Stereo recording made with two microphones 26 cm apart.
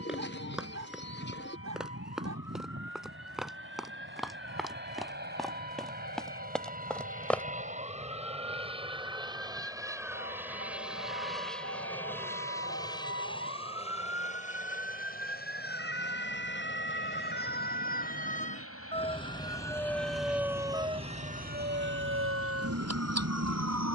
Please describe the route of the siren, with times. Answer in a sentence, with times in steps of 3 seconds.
You can hear the siren on the left from 0 s, in the centre from 18 s and on the right from 21 s.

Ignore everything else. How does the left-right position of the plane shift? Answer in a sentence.
You can hear the plane travel towards the left.